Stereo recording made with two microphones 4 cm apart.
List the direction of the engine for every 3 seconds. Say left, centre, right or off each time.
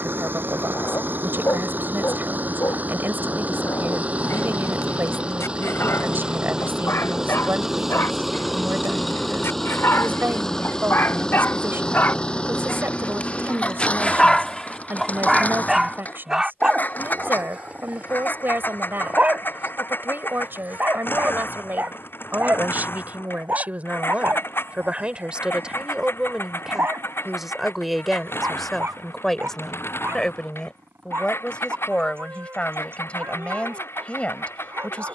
right, right, centre, centre, left, left, left, left, left, left, left, left.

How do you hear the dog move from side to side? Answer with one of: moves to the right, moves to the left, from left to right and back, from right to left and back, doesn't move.
moves to the right.